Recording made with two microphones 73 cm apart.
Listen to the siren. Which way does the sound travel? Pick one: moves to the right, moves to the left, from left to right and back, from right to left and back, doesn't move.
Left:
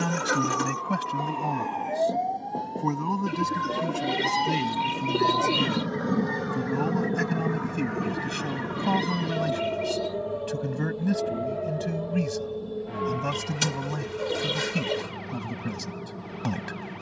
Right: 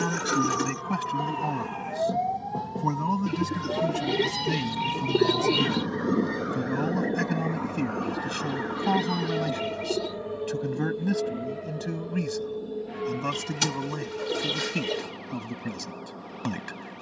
moves to the left.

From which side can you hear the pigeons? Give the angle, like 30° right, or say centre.
centre.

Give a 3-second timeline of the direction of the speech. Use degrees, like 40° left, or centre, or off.
centre, 10° right, centre, 10° left, 20° left, 20° left.